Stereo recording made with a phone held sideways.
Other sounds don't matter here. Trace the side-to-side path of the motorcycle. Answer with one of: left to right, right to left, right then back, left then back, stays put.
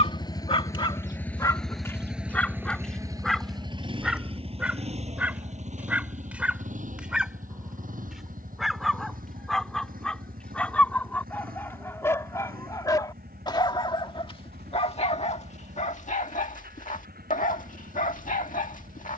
left to right.